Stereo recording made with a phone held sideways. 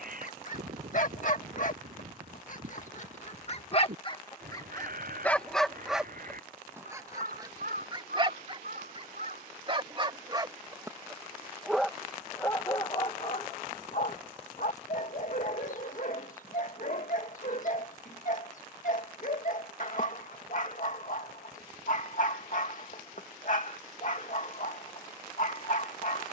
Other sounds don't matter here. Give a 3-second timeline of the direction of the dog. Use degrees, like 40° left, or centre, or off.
60° left, 20° left, 30° right, 30° right, 40° left, 60° left, 60° left, 60° left, 60° left.